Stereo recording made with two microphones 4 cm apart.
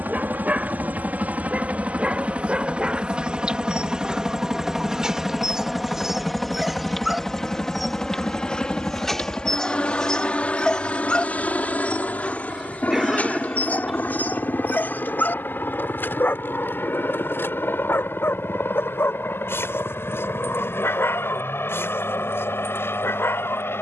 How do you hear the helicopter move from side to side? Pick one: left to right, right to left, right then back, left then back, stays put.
right to left.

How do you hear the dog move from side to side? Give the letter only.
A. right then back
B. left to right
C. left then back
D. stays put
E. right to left
E.